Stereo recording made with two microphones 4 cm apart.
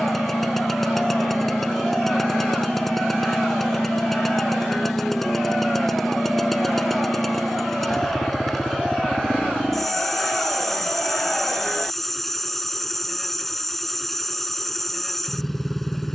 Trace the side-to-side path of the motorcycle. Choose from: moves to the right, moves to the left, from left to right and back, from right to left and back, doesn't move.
doesn't move.